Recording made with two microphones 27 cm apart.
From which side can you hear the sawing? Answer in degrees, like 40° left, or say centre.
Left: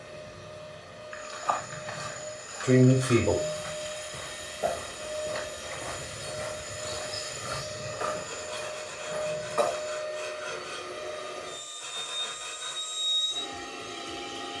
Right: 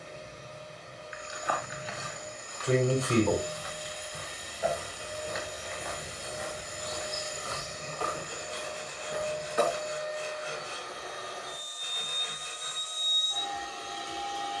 10° left.